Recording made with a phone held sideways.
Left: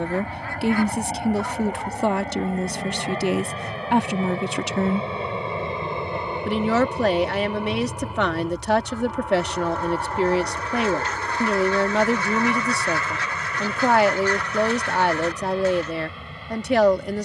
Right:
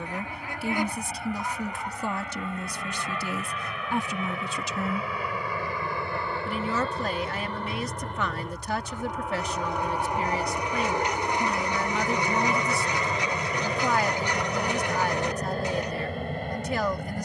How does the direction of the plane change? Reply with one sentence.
You can hear the plane move to the right.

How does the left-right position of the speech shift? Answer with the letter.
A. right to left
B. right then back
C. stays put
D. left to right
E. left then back
C.